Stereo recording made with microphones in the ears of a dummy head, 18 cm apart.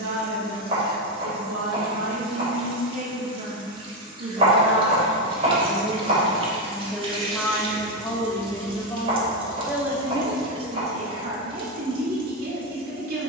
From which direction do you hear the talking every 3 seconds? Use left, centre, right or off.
right, right, centre, right, right.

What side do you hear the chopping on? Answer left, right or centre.
right.